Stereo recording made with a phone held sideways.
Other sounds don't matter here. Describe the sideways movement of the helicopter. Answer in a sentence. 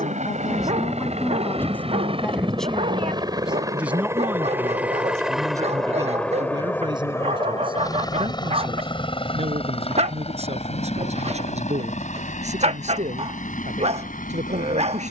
You can hear the helicopter move from right to left.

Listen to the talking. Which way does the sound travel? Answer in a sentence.
In this clip you hear the talking move to the right.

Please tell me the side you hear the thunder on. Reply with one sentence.
In this clip you hear the thunder in the centre.